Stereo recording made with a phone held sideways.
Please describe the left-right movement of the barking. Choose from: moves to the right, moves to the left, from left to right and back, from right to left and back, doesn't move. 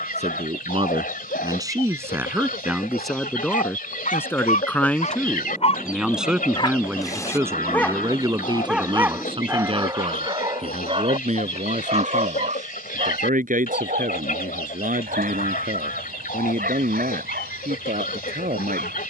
moves to the right.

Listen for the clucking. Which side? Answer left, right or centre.
left.